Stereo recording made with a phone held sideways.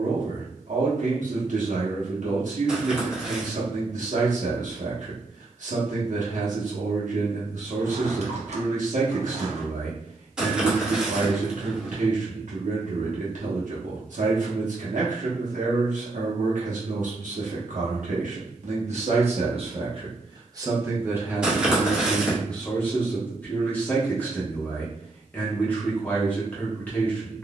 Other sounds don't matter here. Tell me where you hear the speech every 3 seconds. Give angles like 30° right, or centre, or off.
60° right, 60° right, 60° right, 60° right, 60° right, 60° right, 40° right, centre, 10° left.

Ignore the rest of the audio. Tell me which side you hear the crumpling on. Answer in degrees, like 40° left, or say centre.
10° right.